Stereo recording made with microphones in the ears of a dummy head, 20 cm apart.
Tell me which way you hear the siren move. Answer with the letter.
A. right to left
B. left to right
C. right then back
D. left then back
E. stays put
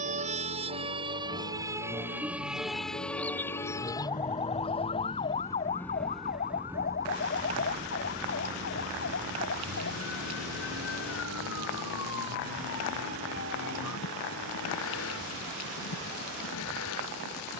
A.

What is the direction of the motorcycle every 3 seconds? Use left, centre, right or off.
left, left, right, right, right, right.